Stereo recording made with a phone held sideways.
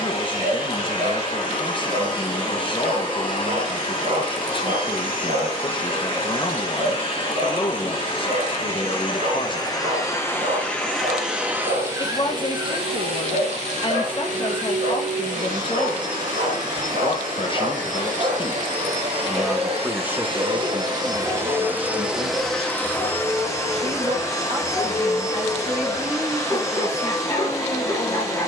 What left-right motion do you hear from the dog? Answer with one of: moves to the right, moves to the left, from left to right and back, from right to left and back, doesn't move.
moves to the left.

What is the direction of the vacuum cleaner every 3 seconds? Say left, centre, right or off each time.
left, left, left, centre, right, right, right, centre, left, left.